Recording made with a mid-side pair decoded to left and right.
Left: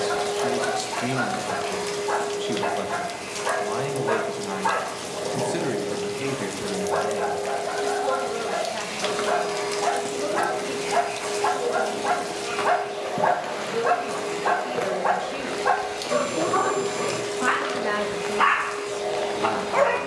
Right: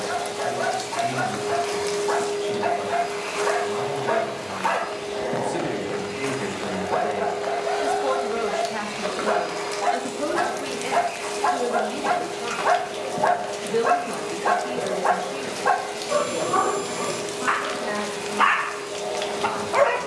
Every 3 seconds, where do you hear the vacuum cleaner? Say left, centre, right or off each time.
centre, right, right, centre, centre, centre, centre.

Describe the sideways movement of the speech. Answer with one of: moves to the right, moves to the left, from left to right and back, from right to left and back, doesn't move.
from left to right and back.